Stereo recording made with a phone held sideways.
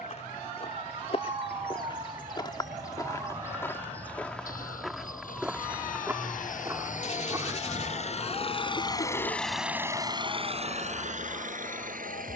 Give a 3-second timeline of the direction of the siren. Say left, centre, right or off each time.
right, centre, left, left.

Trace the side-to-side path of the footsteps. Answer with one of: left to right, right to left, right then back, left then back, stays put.
left to right.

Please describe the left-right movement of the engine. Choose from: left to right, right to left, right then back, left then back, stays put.
left to right.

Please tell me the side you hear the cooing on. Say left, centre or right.
left.